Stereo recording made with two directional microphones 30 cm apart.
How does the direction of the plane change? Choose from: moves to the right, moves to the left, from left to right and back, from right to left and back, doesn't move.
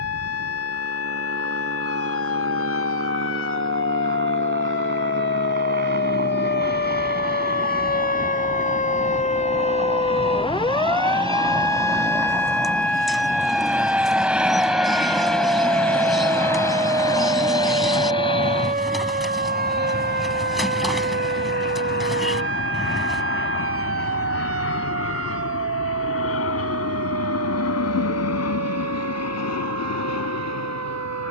moves to the left.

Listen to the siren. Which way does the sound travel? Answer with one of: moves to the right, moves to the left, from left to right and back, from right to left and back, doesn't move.
moves to the right.